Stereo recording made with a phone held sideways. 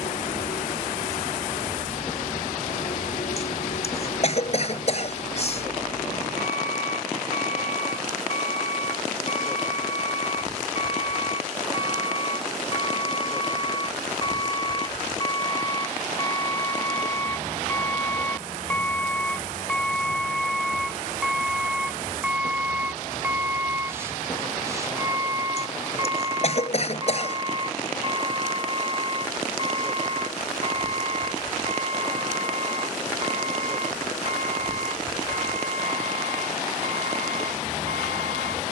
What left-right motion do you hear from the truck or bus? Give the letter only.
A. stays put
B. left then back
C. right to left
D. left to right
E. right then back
D.